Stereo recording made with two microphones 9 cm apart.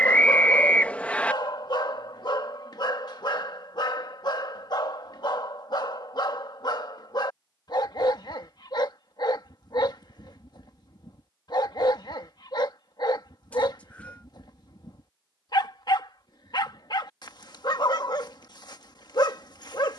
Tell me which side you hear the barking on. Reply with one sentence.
You can hear the barking on the left.